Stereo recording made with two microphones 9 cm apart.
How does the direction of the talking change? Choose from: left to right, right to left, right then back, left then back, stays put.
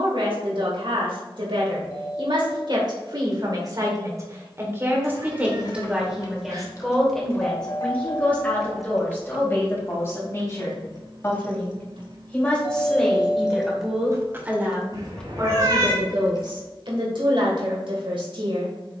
left then back.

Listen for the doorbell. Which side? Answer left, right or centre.
left.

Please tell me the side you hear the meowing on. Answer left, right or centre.
right.